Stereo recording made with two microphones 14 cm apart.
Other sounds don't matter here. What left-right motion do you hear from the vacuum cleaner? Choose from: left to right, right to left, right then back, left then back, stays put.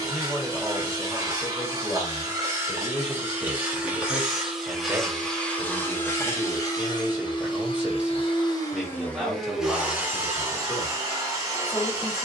left then back.